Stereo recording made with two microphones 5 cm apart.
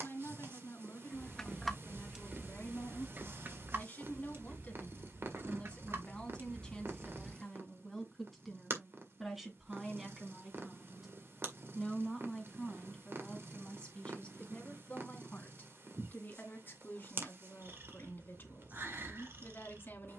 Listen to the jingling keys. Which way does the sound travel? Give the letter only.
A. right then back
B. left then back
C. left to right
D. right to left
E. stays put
A.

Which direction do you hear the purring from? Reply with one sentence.
You can hear the purring on the right.